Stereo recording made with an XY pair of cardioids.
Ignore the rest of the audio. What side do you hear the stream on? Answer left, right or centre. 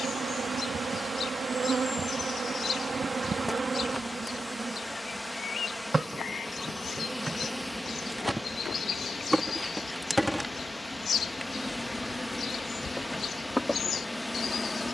centre.